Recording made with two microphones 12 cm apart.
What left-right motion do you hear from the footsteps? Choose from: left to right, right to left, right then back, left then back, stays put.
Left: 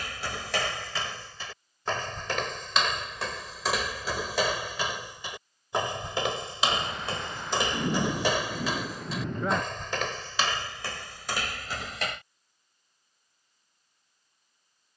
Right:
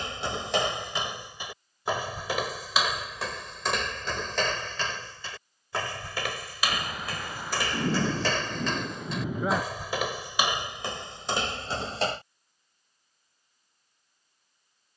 left then back.